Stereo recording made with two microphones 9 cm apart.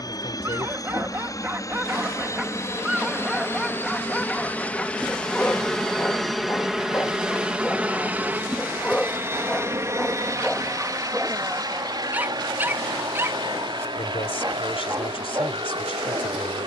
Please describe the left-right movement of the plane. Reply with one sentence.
In this clip you hear the plane move to the right.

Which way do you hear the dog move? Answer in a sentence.
In this clip you hear the dog move from right to left and back again.